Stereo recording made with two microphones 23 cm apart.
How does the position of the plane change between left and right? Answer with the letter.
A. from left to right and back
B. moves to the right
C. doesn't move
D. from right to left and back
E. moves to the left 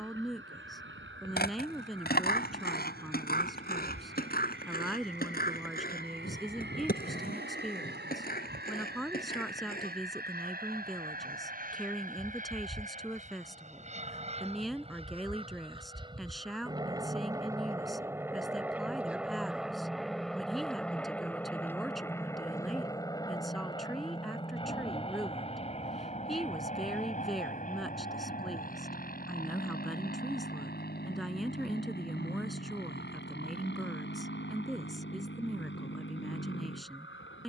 E.